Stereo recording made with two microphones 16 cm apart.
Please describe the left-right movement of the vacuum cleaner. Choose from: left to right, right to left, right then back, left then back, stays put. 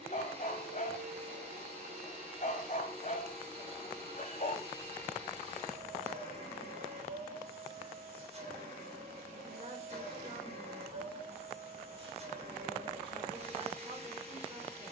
stays put.